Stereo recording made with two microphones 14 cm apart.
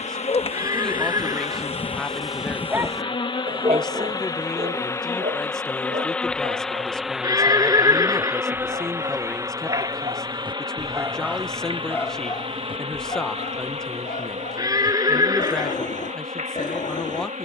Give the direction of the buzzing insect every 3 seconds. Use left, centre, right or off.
left, left, centre, right, right, right.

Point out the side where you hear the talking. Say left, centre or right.
centre.